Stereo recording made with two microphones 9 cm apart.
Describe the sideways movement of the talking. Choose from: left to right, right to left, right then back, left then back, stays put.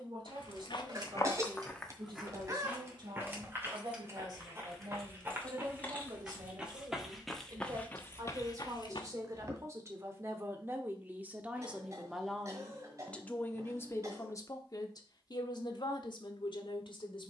right to left.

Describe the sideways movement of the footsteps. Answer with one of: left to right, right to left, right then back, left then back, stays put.
right then back.